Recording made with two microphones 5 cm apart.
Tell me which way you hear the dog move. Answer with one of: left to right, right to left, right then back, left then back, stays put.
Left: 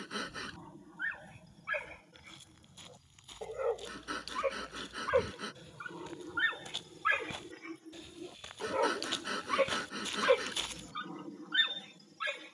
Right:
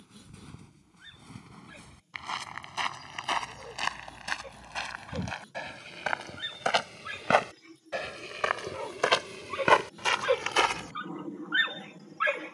left to right.